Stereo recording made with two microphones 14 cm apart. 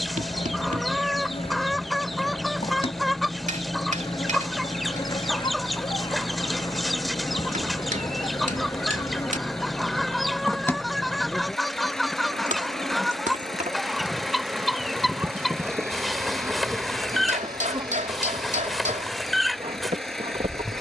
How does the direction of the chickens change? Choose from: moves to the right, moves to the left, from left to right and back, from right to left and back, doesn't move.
doesn't move.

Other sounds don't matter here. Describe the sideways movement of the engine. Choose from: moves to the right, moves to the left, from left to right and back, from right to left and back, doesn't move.
doesn't move.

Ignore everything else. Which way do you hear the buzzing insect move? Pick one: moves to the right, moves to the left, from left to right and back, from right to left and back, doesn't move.
moves to the right.